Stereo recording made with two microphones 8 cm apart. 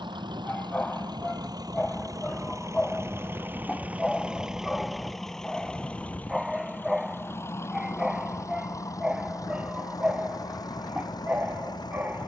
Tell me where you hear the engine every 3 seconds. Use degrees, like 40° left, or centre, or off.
50° right, 10° right, 30° left, 40° left.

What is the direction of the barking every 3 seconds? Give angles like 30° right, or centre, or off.
10° left, centre, 10° right, 20° right.